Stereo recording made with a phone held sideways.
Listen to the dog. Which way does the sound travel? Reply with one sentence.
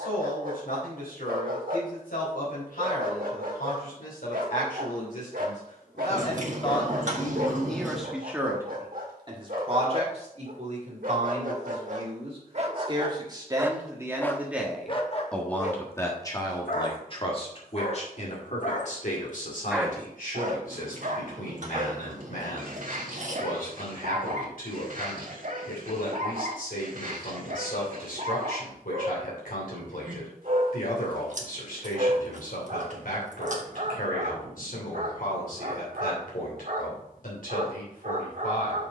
You can hear the dog go left and come back.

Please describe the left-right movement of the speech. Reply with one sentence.
You can hear the speech go right and come back.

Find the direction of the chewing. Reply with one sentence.
In this clip you hear the chewing on the right.